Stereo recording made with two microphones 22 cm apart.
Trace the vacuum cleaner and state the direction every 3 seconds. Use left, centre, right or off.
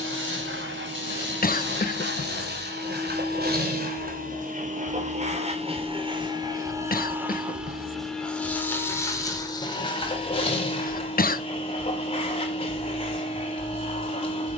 right, right, centre, left, left.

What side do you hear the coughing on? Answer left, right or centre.
left.